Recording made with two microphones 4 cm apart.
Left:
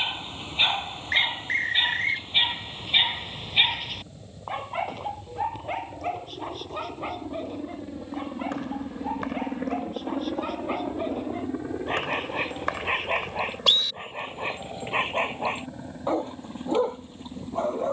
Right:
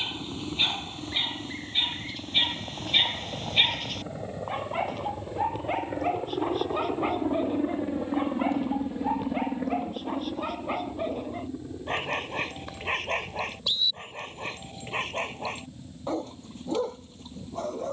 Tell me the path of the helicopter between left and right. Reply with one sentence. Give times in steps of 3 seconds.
You can hear the helicopter on the right from 0 s and on the left from 9 s.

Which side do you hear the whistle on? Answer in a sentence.
You can hear the whistle on the left.